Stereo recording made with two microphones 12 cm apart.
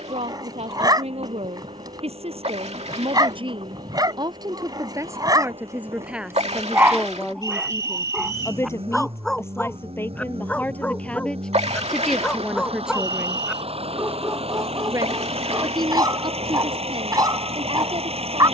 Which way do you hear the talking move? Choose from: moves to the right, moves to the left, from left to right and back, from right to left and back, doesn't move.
from right to left and back.